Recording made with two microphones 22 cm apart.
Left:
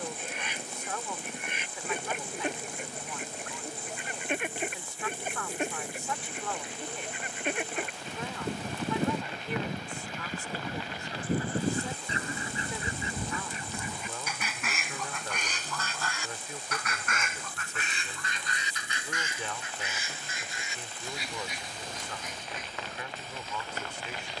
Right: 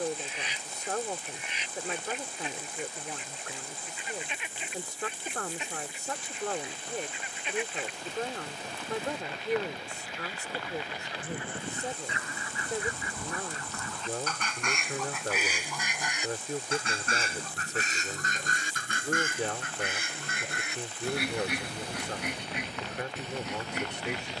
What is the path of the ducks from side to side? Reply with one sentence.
In this clip you hear the ducks move to the right.